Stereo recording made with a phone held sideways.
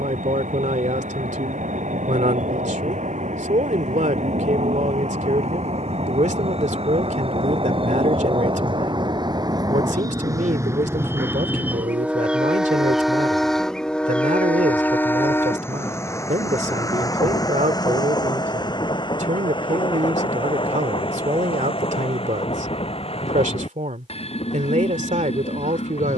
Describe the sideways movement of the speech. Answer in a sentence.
You can hear the speech stay put.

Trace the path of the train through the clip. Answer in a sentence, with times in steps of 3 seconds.
In this clip you hear the train on the right from 0 s, in the centre from 12 s and on the left from 15 s.